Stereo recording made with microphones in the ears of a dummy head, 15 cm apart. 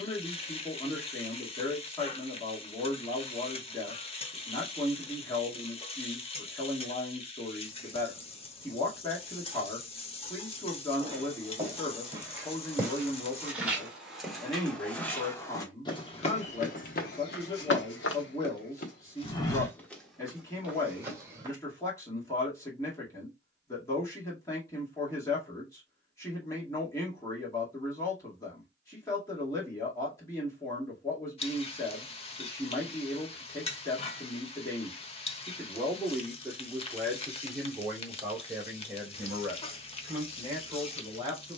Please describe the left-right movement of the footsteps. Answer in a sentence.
You can hear the footsteps go left and come back.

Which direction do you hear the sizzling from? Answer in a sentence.
You can hear the sizzling on the left.